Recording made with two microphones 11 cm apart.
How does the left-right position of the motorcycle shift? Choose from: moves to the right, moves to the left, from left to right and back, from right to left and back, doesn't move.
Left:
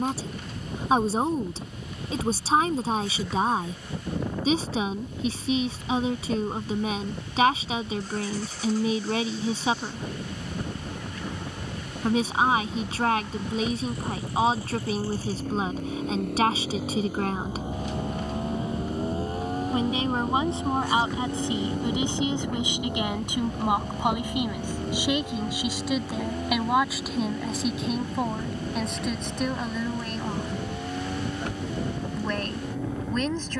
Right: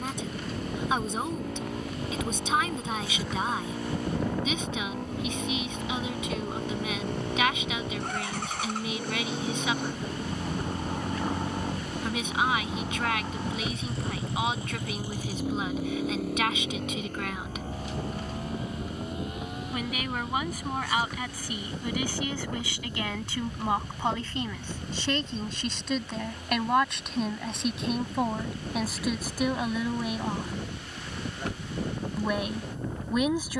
moves to the left.